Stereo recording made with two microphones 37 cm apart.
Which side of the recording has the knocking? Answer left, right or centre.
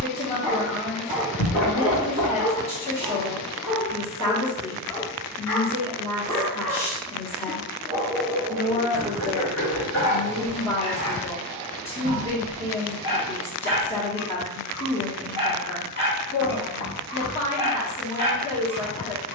left.